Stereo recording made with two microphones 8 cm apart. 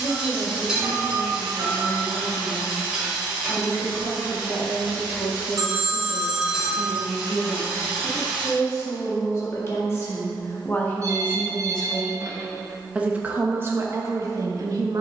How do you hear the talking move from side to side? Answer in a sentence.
You can hear the talking move to the right.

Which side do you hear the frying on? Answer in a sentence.
In this clip you hear the frying in the centre.